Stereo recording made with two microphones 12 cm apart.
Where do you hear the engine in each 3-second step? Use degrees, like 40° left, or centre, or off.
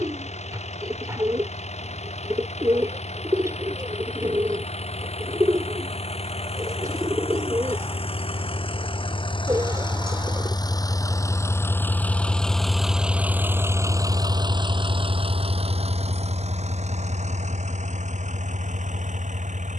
70° left, 60° left, 50° left, 30° left, 20° right, 60° right, 80° right.